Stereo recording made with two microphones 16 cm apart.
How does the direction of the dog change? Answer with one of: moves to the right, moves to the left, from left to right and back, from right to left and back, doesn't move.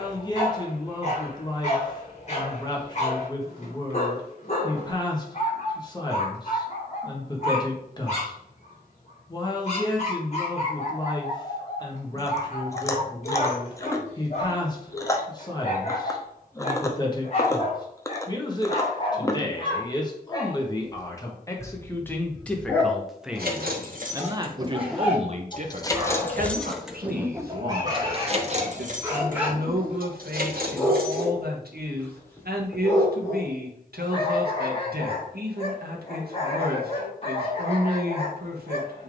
from left to right and back.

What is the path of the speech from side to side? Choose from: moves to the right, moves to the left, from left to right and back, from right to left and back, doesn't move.
moves to the right.